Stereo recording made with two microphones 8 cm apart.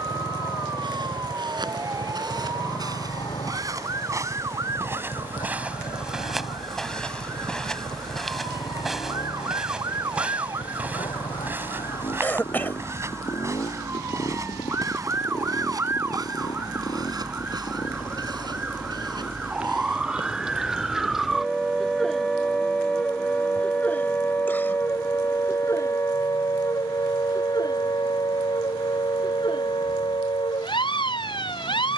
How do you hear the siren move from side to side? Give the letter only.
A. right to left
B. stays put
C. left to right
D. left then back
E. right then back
A.